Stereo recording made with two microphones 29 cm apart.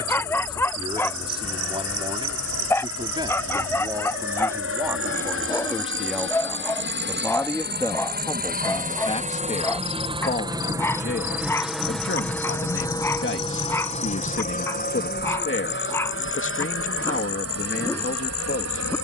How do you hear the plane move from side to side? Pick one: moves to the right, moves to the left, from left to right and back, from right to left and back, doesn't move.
moves to the left.